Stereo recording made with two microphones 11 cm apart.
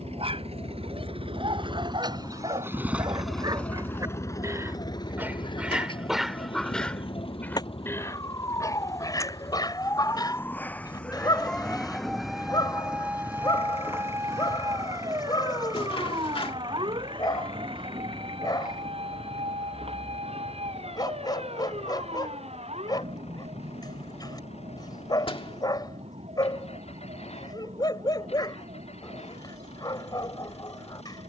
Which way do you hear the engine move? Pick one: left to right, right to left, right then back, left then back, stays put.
right to left.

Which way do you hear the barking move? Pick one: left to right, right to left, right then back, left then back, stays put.
right to left.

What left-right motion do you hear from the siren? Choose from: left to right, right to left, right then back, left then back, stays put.
left to right.